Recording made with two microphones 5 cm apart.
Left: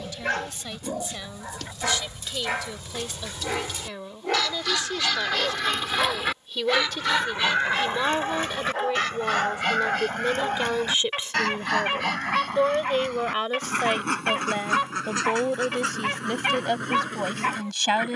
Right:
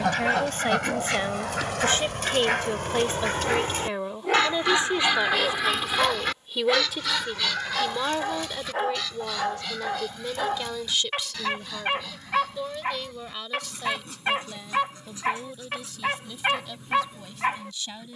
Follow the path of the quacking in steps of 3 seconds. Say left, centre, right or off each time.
right, right, left, left, left, left.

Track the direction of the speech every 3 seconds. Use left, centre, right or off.
right, right, centre, left, left, left.